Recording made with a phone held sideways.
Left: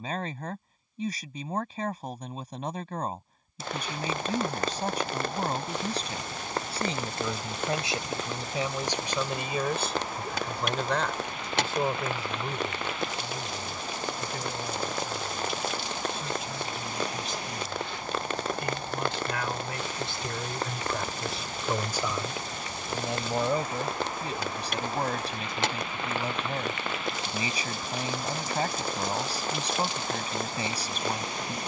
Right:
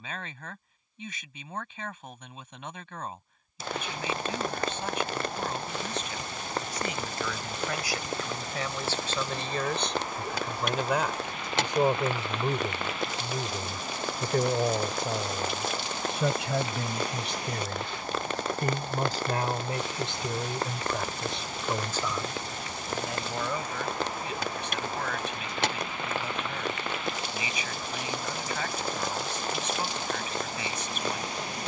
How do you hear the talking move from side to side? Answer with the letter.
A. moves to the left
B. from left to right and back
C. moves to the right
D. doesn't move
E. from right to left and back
B.